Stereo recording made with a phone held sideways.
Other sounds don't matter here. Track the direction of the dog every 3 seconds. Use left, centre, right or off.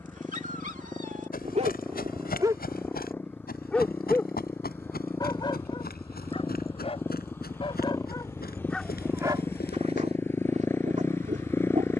right, left, left, right.